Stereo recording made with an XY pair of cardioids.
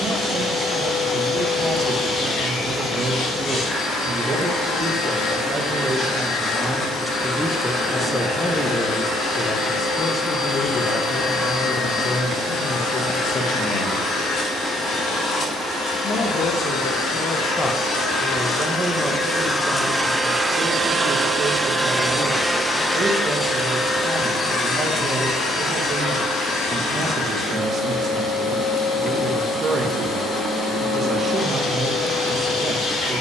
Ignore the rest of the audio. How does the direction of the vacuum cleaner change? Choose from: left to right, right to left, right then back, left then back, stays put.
right then back.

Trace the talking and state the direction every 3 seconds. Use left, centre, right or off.
right, right, centre, left, left, left, right, right, right, right, right.